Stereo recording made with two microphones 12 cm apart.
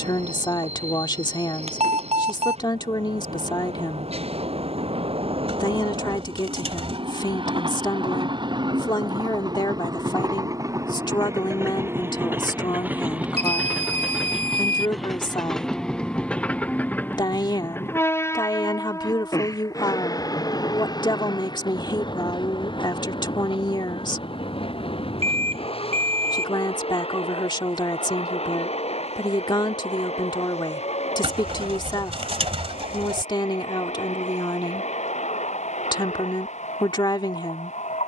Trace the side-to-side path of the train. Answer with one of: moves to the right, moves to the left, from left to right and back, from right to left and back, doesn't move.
moves to the left.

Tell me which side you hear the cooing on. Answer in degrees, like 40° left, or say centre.
50° right.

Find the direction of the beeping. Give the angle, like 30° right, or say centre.
60° right.